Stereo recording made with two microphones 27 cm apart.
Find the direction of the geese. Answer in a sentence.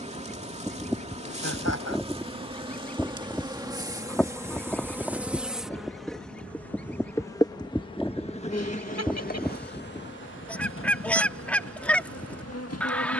In this clip you hear the geese in the centre.